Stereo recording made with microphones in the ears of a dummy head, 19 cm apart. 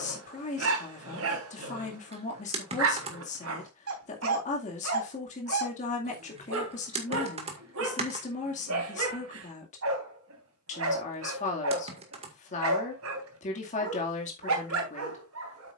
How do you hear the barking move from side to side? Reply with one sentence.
In this clip you hear the barking stay put.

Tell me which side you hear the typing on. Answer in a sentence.
You can hear the typing on the right.